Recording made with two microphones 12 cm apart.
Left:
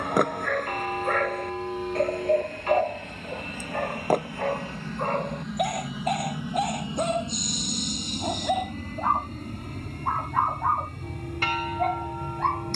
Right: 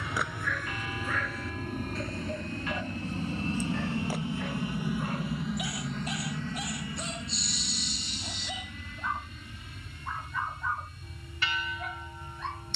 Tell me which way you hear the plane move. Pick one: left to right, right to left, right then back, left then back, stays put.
right to left.